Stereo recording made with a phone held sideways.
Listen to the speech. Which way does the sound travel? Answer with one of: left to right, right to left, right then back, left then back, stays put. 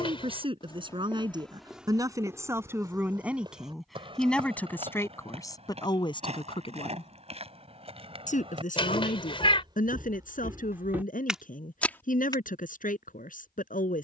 right to left.